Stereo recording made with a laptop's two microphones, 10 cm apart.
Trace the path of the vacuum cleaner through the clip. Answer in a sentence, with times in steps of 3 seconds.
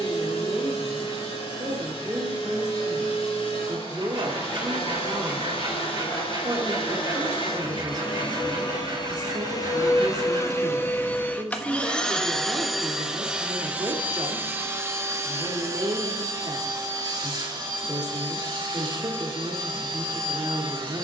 You can hear the vacuum cleaner on the left from 0 s, in the centre from 12 s and on the right from 15 s.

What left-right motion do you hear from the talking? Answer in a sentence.
In this clip you hear the talking stay in one place.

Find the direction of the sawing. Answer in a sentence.
You can hear the sawing on the right.